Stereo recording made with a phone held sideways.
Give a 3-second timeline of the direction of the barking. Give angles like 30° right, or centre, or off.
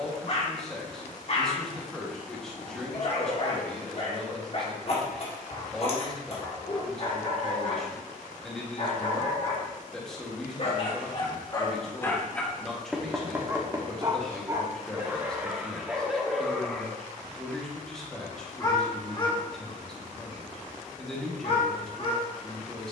50° left, 50° left, 50° left, 40° left, 10° right, centre, 30° left, 40° left.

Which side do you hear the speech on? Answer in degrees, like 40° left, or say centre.
centre.